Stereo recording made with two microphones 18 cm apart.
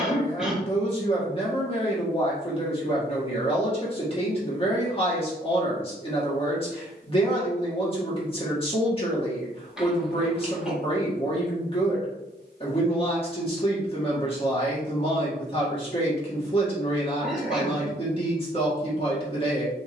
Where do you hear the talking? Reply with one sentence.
In this clip you hear the talking on the left.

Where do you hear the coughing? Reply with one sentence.
In this clip you hear the coughing in the centre.